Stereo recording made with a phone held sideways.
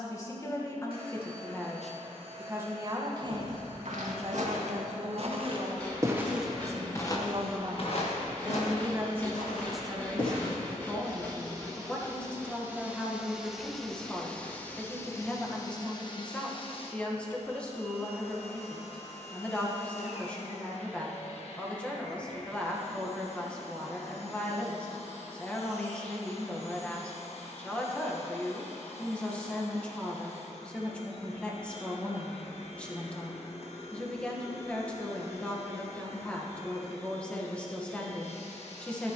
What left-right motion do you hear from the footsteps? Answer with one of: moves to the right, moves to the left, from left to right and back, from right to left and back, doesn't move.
moves to the left.